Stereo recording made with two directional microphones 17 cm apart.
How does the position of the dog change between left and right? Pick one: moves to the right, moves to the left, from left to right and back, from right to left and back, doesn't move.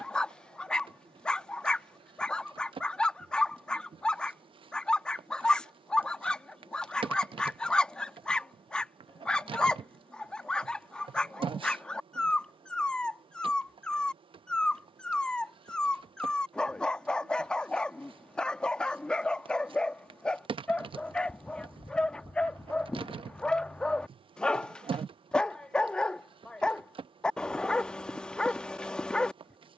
doesn't move.